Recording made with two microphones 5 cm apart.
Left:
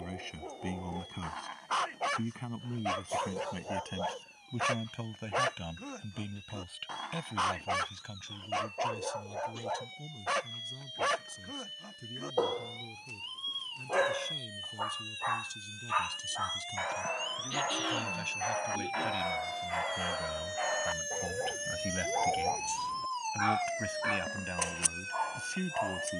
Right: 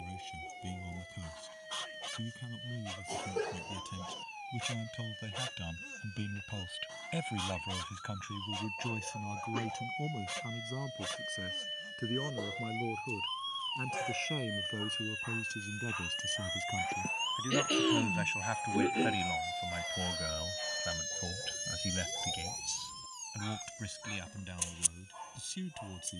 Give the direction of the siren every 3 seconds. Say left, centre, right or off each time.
right, right, right, right, right, right, centre, left, left.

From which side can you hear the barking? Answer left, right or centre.
left.